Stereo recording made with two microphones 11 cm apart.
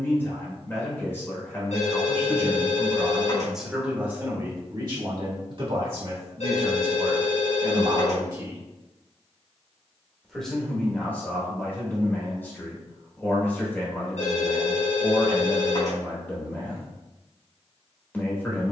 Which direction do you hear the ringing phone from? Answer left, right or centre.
left.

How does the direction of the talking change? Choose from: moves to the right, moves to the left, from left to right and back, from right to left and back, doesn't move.
from left to right and back.